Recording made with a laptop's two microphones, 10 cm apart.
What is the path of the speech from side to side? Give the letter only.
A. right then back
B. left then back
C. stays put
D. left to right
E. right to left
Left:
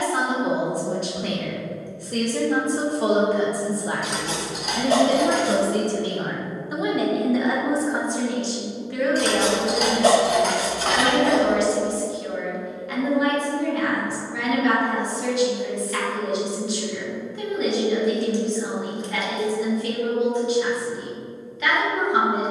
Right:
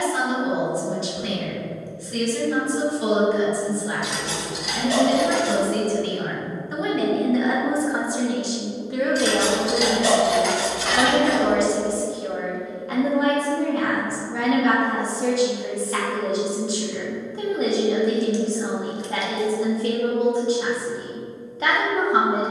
D.